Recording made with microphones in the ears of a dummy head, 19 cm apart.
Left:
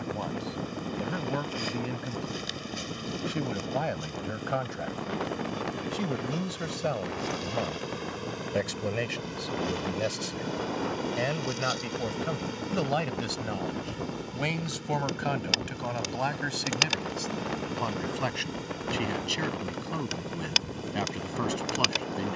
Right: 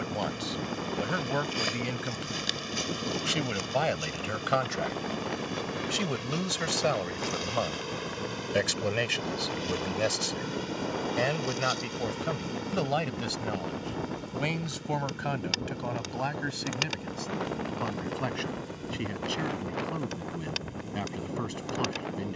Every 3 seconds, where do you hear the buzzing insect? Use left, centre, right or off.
right, right, right, centre, centre, left, left, left.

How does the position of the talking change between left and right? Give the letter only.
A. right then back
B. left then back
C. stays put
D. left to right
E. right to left
E.